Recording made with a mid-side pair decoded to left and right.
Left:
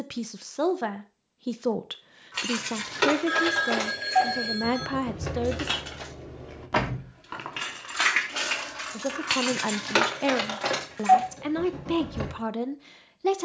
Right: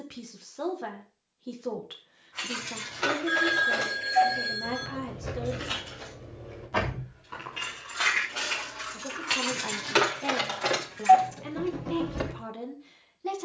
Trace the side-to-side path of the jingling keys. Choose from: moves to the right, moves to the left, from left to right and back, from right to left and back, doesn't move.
moves to the right.